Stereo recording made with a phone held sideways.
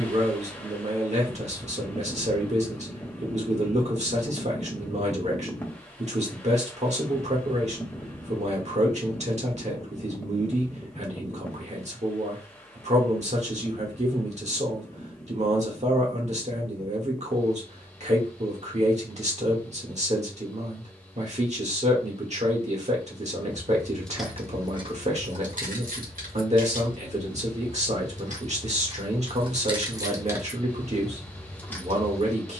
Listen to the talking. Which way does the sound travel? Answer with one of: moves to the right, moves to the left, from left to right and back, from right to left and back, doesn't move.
doesn't move.